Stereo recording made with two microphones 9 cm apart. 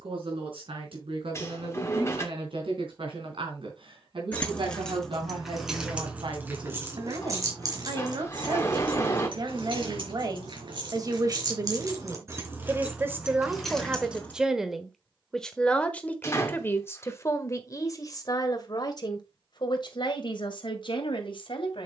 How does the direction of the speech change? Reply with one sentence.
You can hear the speech go from the right side to the left.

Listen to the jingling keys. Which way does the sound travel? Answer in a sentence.
You can hear the jingling keys move from left to right and back again.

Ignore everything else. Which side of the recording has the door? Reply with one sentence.
You can hear the door on the left.